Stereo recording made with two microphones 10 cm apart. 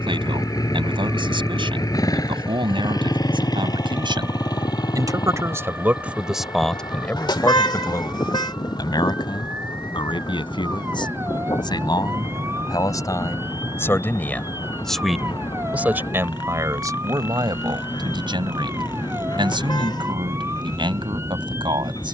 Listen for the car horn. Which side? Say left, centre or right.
left.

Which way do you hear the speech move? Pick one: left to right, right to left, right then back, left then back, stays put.
left then back.